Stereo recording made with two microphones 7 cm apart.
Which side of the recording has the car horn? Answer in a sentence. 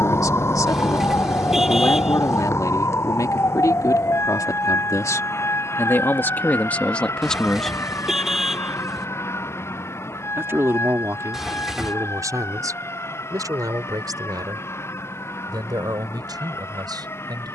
In this clip you hear the car horn in the centre.